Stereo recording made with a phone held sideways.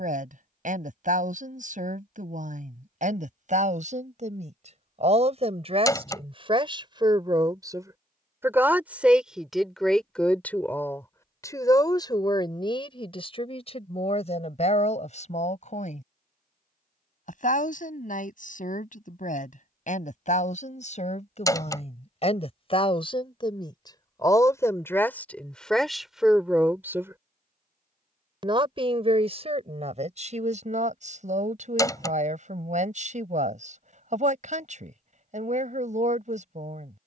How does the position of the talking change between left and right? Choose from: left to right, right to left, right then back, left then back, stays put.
left then back.